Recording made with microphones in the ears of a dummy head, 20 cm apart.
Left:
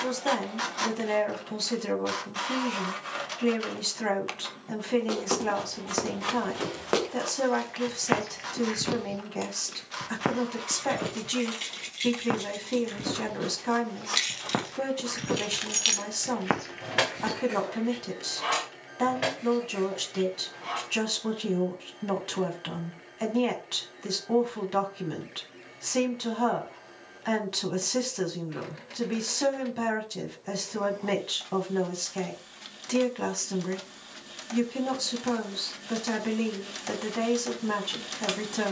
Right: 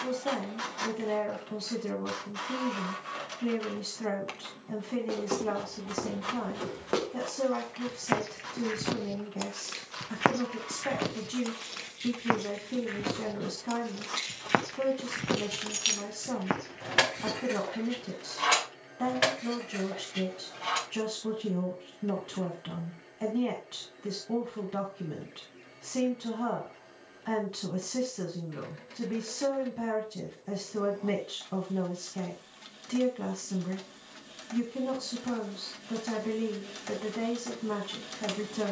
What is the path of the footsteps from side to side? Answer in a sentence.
In this clip you hear the footsteps go right and come back.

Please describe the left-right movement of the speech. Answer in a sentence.
In this clip you hear the speech stay in one place.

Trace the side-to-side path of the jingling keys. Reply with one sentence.
In this clip you hear the jingling keys travel towards the right.